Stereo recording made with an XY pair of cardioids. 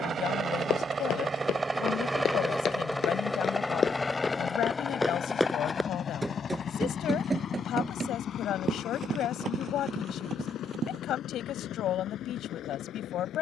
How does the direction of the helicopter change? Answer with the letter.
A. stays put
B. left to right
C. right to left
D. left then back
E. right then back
C.